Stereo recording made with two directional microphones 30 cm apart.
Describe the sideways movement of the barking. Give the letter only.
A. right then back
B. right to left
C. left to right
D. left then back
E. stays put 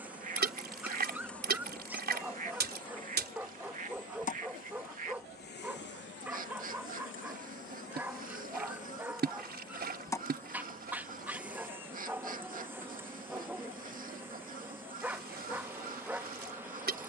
E.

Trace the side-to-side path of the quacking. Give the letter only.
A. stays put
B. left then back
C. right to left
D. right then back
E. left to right
A.